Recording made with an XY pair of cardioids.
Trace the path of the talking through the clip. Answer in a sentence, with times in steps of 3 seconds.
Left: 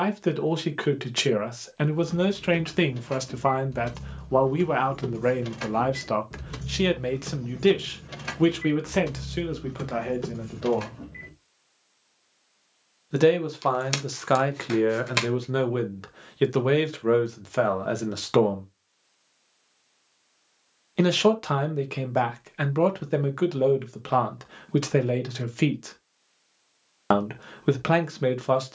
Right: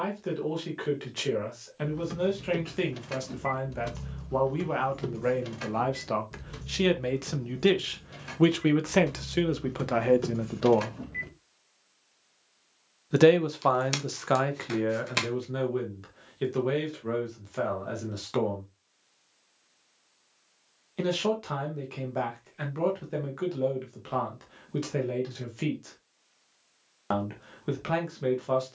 You can hear the talking on the left from 0 s, in the centre from 6 s, on the right from 9 s, in the centre from 12 s and on the left from 15 s.